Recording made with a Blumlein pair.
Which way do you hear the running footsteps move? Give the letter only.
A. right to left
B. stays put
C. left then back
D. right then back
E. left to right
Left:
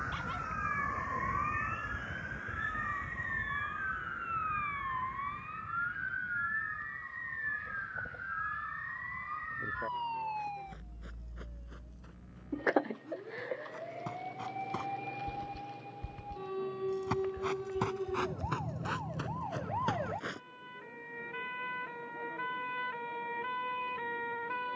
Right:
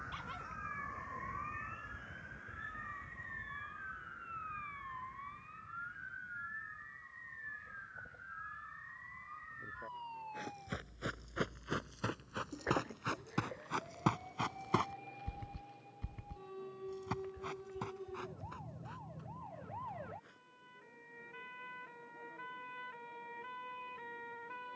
A.